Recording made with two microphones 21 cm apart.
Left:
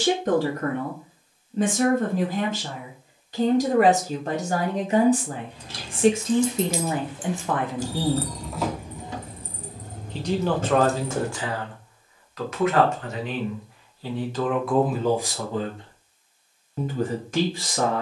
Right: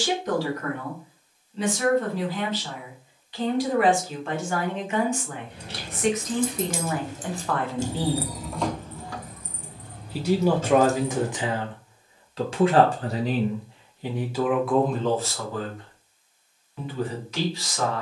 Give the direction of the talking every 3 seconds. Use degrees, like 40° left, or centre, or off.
50° left, 40° left, 20° left, 10° right, 20° right, 30° left.